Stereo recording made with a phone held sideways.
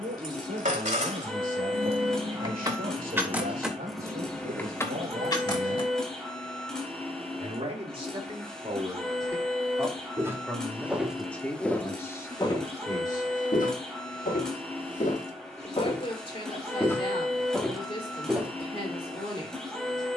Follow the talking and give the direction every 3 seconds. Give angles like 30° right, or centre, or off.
60° right, 60° right, 30° right, centre, 20° left, 40° left, 40° left.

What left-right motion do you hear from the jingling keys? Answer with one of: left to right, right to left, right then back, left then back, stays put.
right to left.